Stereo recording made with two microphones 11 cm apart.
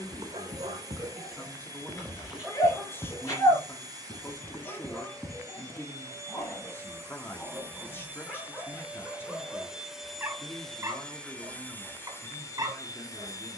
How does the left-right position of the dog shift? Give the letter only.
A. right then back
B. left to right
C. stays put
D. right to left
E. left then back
E.